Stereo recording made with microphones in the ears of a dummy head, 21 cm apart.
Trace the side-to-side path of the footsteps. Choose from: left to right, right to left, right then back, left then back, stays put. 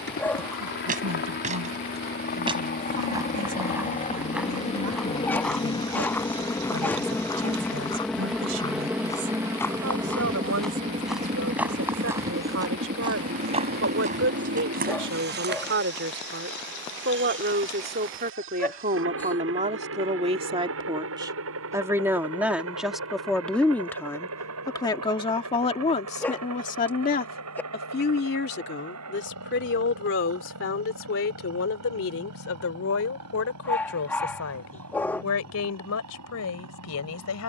left then back.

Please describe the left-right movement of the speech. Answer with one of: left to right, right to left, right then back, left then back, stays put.
right to left.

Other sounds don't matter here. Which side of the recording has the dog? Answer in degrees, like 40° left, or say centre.
10° left.